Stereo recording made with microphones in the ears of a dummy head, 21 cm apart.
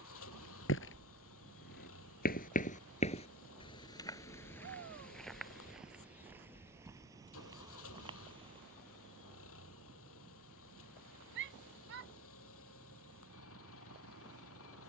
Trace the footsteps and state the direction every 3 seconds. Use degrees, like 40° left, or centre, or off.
50° left, 10° left, 20° right, off, off.